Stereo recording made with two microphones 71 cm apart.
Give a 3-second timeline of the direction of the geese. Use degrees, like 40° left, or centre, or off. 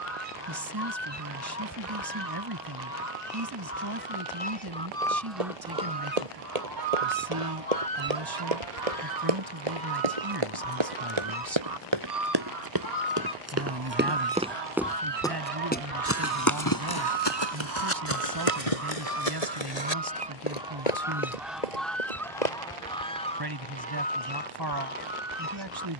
20° left, 10° left, 50° right, 80° right, 60° right, 40° right, 20° right, centre, 20° left.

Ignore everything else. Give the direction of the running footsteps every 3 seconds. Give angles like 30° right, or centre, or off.
off, 60° right, 60° right, 50° right, 20° right, 30° left, 50° left, 70° left, off.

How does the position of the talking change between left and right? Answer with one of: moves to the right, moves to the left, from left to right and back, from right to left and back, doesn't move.
doesn't move.